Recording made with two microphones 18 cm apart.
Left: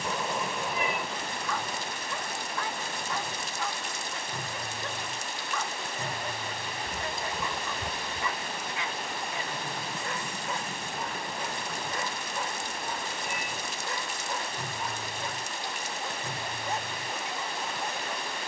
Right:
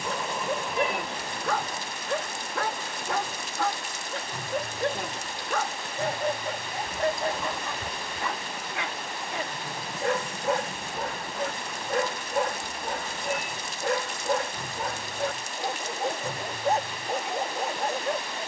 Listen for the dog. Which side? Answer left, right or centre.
right.